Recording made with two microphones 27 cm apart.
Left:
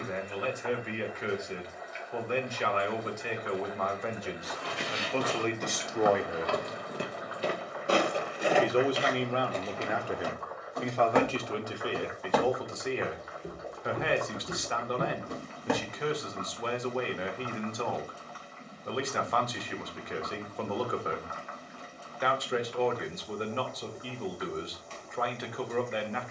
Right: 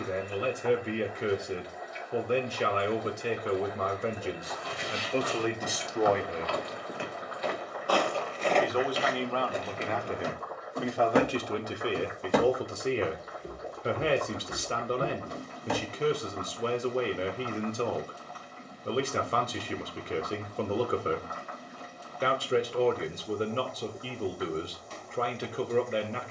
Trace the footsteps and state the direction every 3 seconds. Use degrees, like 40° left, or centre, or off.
off, 70° left, 30° left, 20° right, 10° left, 60° left, off, off, off.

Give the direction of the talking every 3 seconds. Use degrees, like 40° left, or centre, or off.
40° right, 30° right, 20° left, centre, 30° right, 30° right, 30° right, 30° right, 30° right.